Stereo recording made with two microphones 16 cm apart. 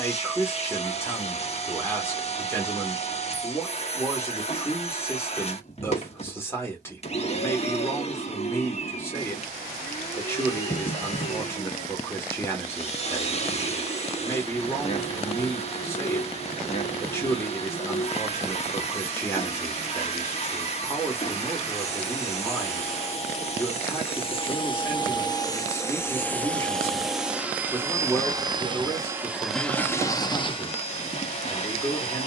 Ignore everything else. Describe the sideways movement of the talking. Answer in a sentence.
You can hear the talking stay put.